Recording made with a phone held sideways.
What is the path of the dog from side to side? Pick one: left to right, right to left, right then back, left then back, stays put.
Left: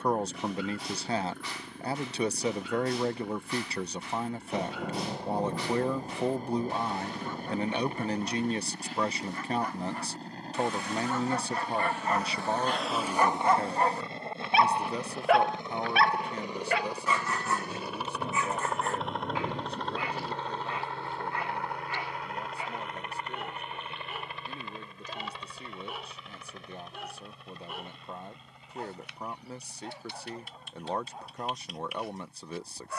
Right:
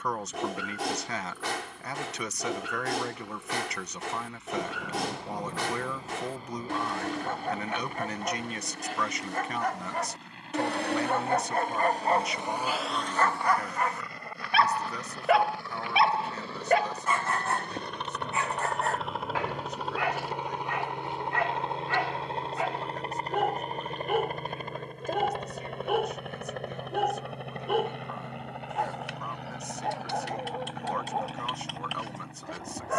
left then back.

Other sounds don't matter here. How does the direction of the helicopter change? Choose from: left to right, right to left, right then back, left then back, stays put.
left to right.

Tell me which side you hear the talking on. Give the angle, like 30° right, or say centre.
30° left.